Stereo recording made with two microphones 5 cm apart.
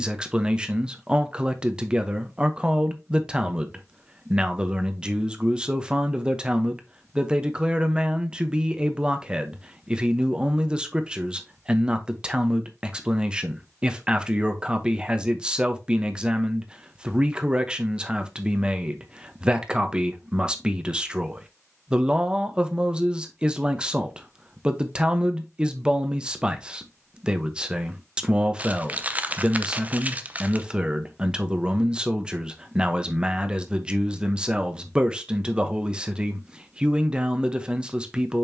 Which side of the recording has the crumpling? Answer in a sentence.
You can hear the crumpling on the right.